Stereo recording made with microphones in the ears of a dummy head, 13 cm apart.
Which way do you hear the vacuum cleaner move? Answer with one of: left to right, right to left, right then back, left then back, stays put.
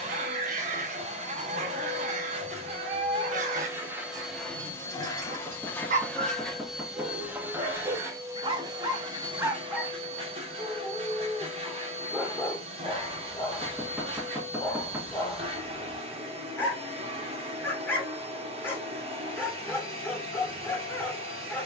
left then back.